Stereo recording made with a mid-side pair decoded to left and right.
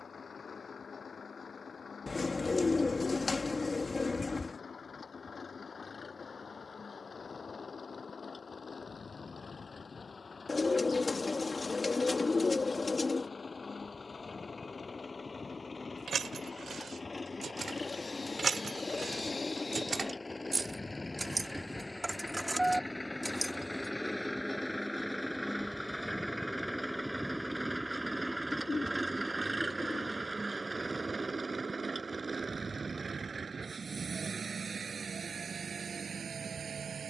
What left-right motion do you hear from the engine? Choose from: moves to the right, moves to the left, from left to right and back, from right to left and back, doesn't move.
moves to the right.